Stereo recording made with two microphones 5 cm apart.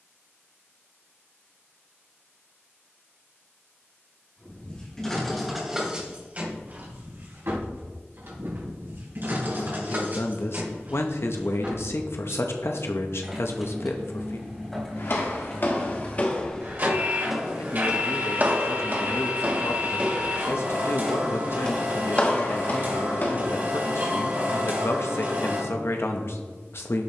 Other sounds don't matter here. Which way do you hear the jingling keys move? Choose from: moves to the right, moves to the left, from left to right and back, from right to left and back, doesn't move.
from left to right and back.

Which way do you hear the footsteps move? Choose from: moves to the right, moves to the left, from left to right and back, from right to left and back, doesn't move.
from left to right and back.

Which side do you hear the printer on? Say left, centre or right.
right.